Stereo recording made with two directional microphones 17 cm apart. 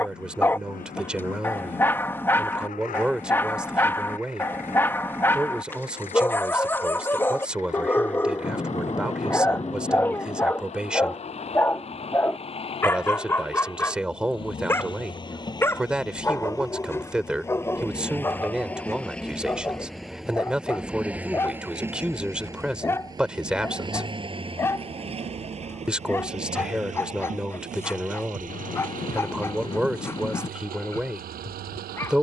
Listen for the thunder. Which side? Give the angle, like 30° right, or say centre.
30° left.